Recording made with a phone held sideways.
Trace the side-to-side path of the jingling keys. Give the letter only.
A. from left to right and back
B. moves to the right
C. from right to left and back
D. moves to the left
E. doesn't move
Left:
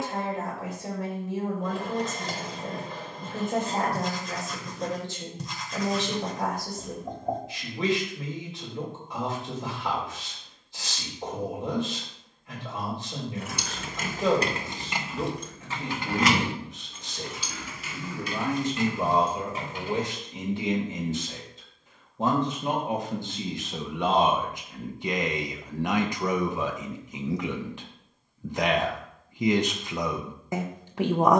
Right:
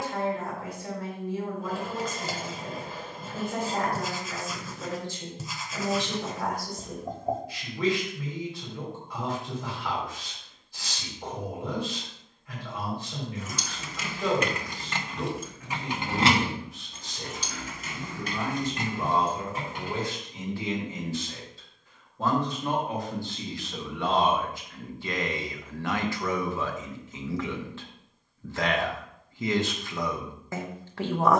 B.